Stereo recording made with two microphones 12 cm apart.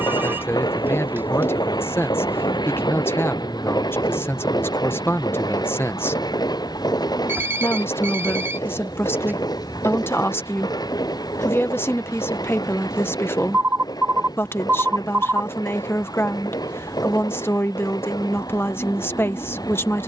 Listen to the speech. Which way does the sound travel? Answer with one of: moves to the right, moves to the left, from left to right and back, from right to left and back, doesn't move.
doesn't move.